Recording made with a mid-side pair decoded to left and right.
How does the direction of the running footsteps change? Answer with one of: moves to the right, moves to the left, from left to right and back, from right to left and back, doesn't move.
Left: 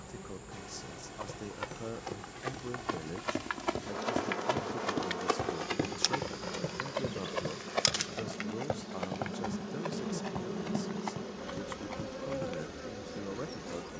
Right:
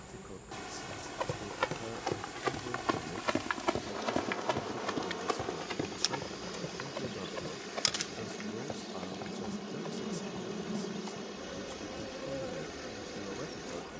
moves to the left.